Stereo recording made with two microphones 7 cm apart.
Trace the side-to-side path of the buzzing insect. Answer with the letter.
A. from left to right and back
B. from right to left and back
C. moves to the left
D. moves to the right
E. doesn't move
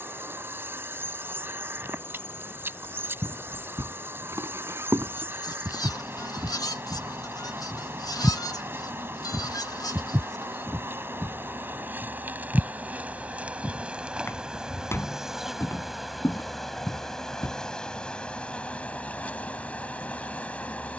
C.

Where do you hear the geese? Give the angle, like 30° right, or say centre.
60° left.